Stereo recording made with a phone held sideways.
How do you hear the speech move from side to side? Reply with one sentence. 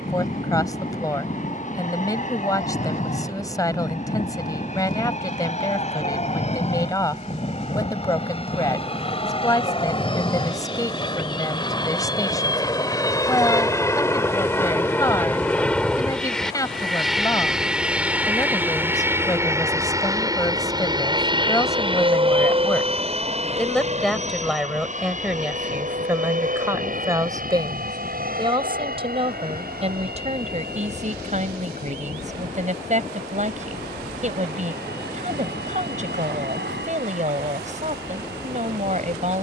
You can hear the speech move from left to right.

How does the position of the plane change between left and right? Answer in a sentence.
You can hear the plane travel towards the right.